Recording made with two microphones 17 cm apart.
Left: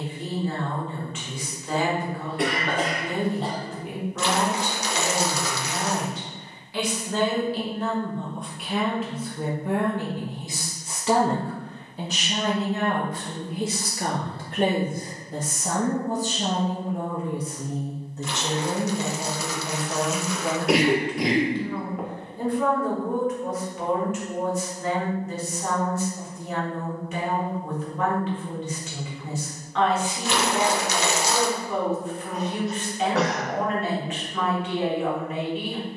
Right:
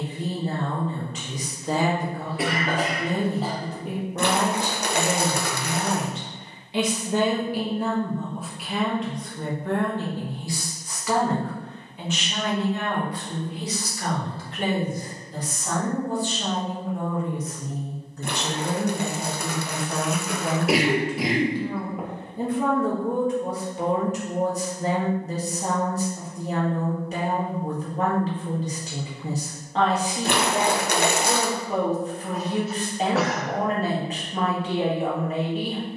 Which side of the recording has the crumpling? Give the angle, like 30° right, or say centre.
60° right.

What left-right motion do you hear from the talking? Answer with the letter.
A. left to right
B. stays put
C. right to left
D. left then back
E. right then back
D.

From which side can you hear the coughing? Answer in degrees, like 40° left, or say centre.
centre.